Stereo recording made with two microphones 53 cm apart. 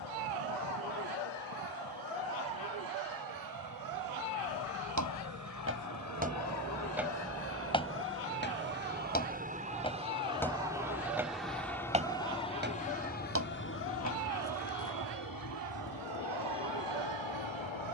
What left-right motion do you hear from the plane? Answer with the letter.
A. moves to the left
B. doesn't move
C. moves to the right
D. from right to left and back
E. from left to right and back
A.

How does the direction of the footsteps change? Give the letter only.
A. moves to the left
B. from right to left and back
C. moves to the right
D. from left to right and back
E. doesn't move
B.